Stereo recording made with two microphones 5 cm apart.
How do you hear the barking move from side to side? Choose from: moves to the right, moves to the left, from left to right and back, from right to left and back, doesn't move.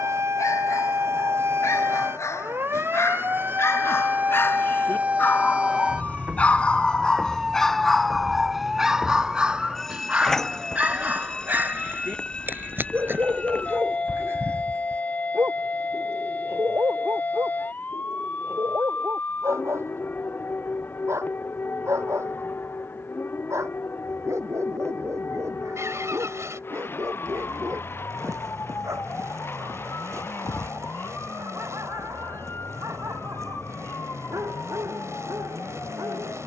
moves to the right.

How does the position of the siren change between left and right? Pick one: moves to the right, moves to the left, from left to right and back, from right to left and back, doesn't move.
moves to the left.